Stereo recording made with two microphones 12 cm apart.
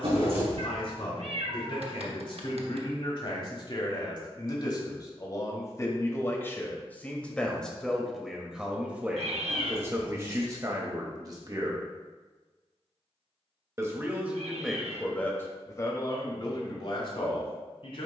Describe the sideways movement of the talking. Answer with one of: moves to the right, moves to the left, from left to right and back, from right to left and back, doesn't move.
from left to right and back.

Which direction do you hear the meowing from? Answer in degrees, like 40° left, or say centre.
70° right.